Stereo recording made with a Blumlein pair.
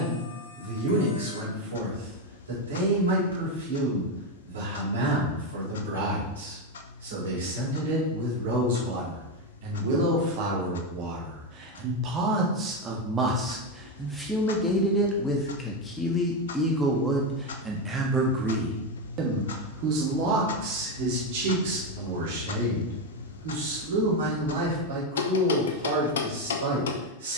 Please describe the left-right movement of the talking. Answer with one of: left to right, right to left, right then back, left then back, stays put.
left then back.